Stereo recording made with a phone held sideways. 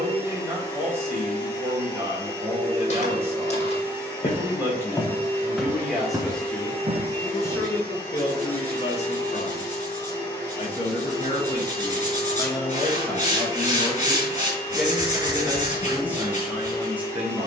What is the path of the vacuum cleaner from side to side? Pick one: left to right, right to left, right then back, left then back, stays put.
stays put.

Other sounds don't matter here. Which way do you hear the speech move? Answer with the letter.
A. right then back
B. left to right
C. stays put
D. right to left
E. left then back
E.